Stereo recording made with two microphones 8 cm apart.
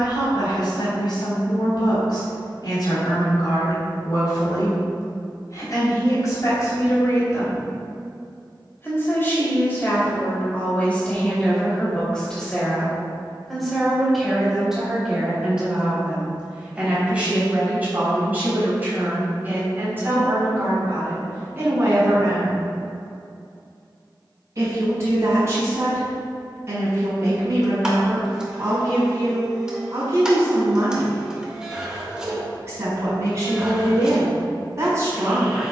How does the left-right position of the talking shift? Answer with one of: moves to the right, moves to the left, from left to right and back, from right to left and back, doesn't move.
moves to the right.